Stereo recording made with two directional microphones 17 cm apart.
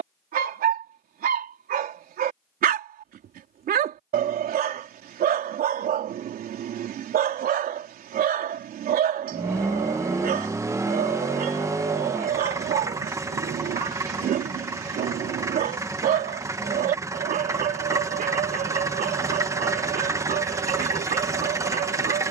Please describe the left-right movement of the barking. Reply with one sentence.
In this clip you hear the barking stay in one place.